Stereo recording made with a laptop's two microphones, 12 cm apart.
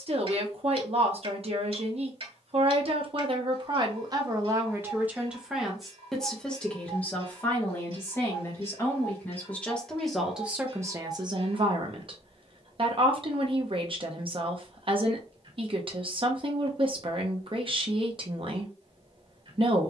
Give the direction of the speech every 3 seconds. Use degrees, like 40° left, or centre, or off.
60° right, 30° right, 20° left, 10° right, 50° right, 50° right, 50° right.